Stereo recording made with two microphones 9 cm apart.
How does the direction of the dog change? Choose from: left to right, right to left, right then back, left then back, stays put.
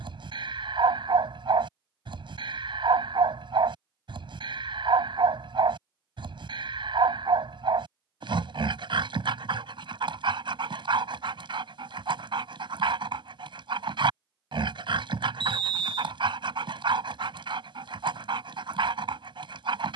stays put.